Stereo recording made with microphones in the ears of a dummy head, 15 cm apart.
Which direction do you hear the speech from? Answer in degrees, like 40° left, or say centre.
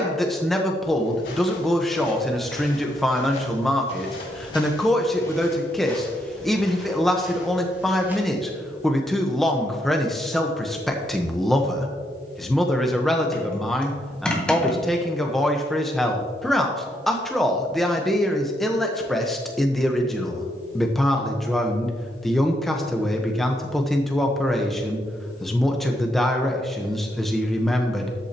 centre.